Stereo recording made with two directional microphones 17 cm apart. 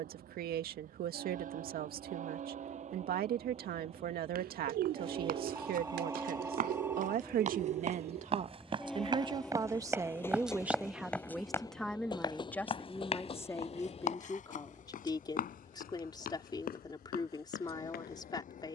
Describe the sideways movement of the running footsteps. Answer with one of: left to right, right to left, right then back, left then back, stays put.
right to left.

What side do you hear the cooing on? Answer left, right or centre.
right.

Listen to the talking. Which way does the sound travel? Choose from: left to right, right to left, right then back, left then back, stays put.
right to left.